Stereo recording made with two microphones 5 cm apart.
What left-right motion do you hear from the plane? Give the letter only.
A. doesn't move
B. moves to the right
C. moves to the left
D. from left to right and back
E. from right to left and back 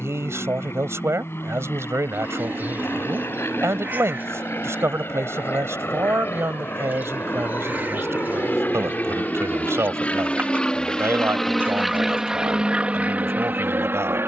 B.